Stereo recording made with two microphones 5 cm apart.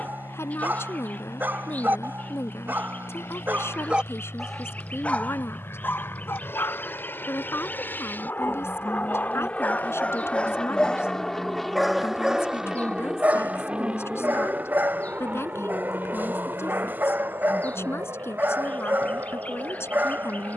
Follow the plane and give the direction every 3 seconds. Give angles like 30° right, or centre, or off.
70° left, 60° left, 40° left, 20° left, 10° right, 40° right, 50° right.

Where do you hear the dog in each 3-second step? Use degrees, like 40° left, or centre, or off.
40° right, centre, 50° left, 20° left, 30° right, 40° right, 40° right.